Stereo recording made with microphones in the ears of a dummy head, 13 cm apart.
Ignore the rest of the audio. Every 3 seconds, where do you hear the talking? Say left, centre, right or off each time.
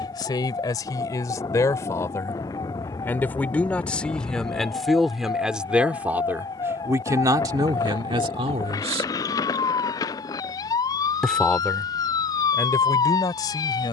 left, centre, right, centre, left.